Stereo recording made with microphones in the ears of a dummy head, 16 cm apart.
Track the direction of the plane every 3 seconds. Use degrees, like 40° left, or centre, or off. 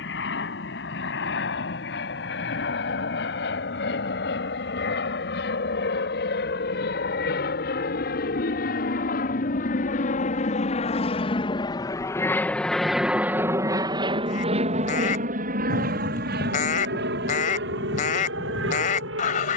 80° left, 70° left, 60° left, 40° left, 10° right, 50° right, 70° right.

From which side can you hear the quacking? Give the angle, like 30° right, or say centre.
50° left.